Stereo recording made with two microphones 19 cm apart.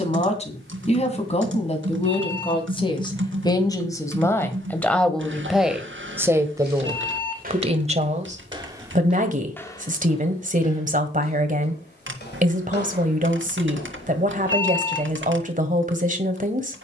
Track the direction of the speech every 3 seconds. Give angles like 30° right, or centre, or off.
30° left, 10° left, 30° right, 40° right, 40° right, 40° right.